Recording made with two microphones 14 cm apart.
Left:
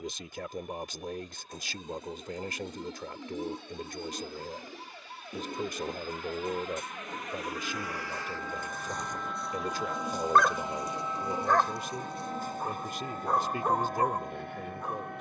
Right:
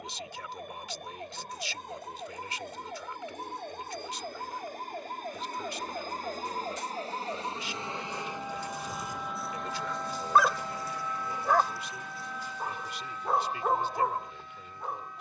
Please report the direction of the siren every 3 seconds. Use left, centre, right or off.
right, right, right, centre, left.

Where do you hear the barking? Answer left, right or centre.
centre.